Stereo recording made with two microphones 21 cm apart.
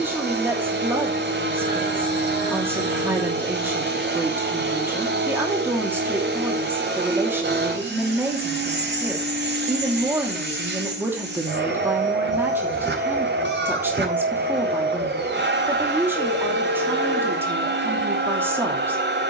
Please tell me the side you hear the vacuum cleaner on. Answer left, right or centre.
right.